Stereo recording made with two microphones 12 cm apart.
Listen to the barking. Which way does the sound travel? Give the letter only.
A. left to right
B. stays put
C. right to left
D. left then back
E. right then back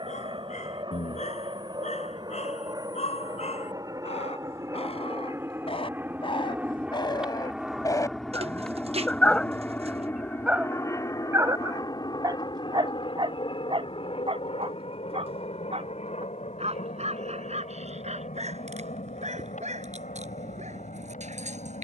A.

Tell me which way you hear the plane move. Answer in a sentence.
You can hear the plane go from the right side to the left.